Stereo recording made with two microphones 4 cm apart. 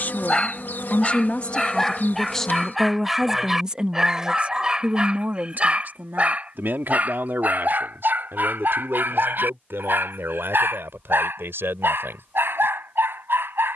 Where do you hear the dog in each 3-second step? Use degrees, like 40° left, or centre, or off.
10° left, 20° right, 40° right, 60° right, 60° right.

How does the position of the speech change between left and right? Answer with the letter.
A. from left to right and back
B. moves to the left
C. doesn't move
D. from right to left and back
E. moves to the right
E.